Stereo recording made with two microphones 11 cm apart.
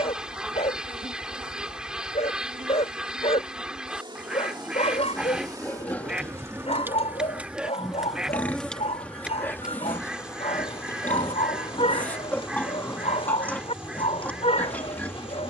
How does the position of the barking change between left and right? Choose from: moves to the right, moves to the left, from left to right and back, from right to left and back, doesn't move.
doesn't move.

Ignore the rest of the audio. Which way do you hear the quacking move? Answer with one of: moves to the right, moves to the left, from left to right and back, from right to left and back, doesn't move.
doesn't move.